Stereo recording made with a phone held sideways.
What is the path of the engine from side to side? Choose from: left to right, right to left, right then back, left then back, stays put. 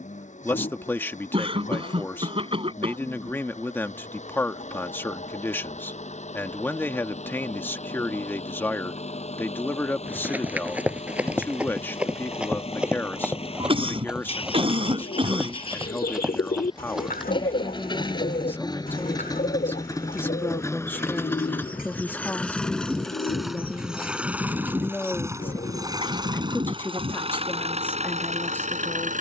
left to right.